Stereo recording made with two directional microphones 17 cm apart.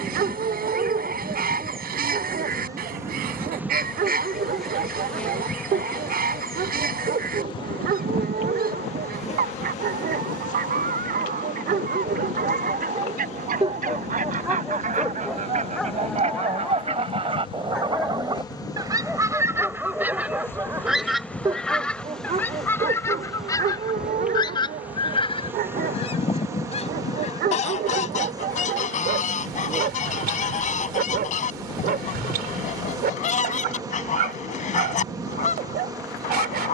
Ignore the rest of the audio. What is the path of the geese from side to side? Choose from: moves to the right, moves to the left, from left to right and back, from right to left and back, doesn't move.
moves to the left.